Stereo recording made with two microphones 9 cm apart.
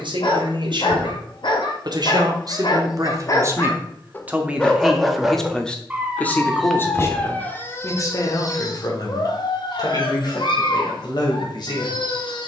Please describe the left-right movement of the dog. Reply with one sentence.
You can hear the dog go right and come back.